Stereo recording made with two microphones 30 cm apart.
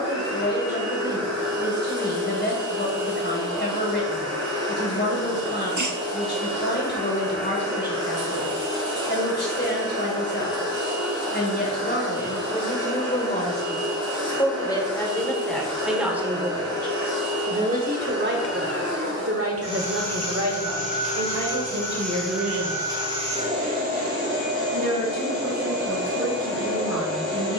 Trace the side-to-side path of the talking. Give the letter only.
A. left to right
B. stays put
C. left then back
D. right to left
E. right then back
A.